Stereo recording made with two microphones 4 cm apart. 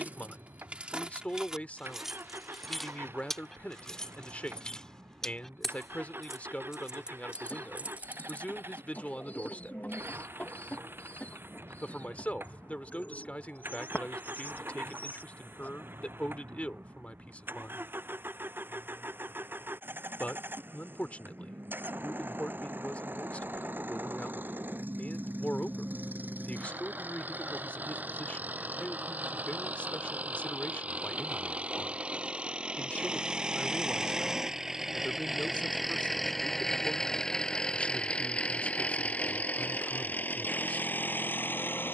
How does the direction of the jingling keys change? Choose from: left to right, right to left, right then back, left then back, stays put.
left then back.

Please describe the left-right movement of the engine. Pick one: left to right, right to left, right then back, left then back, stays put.
right to left.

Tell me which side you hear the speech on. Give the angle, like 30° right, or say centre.
30° left.